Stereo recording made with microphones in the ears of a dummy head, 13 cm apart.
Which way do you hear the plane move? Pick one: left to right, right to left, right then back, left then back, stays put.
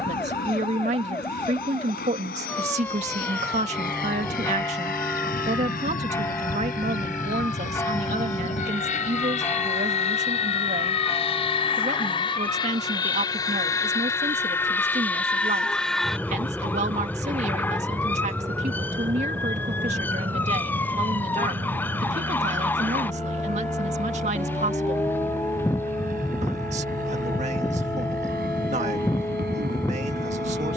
left to right.